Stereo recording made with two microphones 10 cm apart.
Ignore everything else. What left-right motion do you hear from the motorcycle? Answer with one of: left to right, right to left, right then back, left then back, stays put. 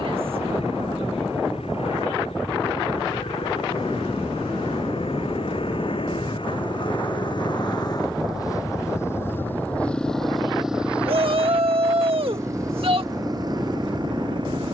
left to right.